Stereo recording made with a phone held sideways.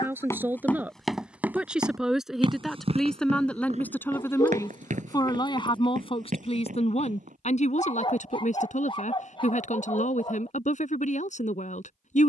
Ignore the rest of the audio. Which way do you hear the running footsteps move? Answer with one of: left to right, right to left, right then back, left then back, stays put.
left to right.